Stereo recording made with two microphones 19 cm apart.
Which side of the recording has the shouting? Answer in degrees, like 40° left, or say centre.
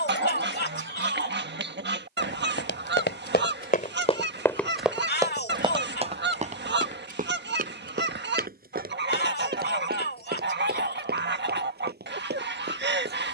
60° left.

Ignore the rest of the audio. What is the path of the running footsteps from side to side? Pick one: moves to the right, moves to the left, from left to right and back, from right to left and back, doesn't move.
moves to the right.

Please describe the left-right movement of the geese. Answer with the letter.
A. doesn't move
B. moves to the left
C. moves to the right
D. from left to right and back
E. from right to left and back
A.